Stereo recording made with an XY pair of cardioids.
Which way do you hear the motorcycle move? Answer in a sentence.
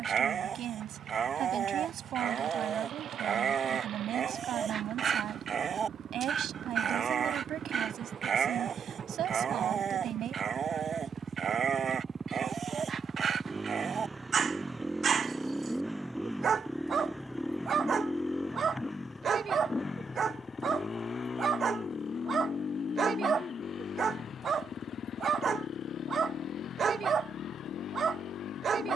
In this clip you hear the motorcycle go from the right side to the left.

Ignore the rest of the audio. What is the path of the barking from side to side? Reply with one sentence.
You can hear the barking stay put.